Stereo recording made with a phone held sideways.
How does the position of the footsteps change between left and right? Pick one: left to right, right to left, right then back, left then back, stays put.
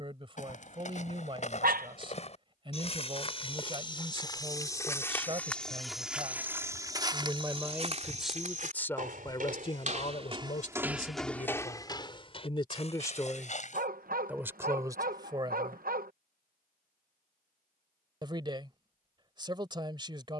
right then back.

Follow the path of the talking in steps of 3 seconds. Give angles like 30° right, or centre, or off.
30° right, 30° right, 10° right, 50° left, 10° left, 30° right, 30° right.